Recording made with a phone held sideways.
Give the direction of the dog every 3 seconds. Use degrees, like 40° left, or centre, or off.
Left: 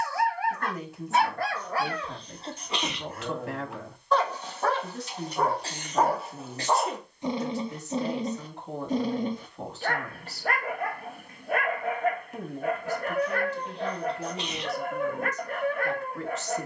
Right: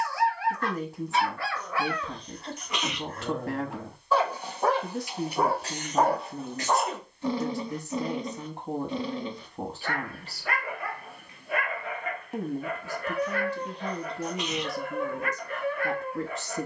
40° left, centre, 20° left, 50° left, 50° left, 50° left.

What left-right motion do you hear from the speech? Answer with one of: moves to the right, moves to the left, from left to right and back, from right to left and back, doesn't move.
doesn't move.